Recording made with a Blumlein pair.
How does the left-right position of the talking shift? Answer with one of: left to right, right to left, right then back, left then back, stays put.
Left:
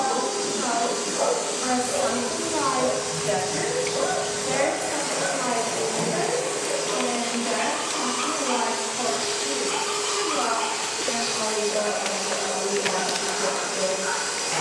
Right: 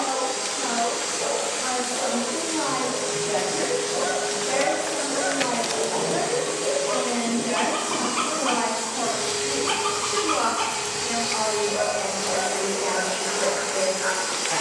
left to right.